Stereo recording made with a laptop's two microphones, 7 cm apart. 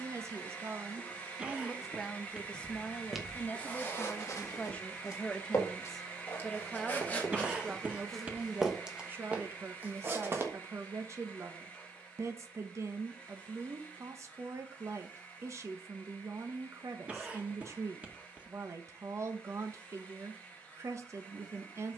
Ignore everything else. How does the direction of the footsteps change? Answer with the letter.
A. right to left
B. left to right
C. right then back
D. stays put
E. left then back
E.